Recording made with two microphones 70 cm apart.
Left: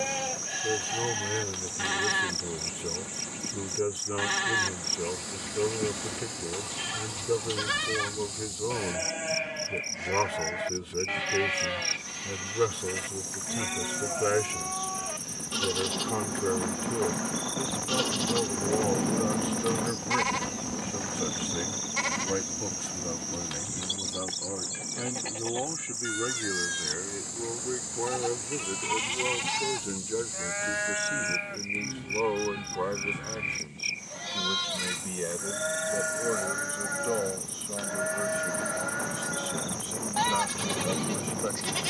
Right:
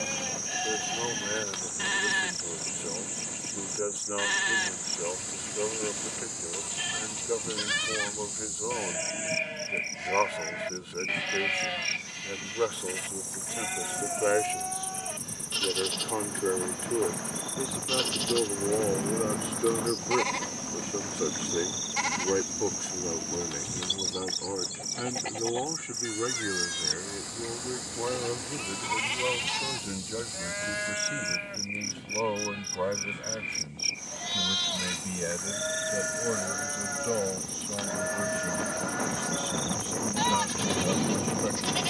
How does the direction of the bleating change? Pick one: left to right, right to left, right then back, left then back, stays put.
right then back.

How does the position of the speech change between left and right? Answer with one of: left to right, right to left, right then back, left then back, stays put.
left to right.